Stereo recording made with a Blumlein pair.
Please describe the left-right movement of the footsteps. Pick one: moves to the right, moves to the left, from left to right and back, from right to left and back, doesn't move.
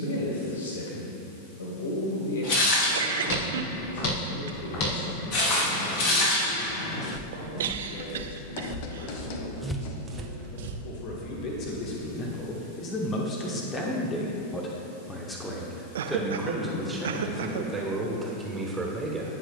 moves to the right.